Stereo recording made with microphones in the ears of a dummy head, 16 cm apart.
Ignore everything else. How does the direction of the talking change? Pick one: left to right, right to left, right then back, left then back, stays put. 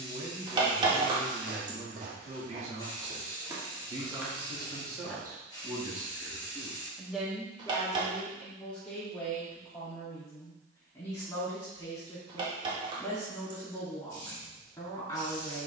right to left.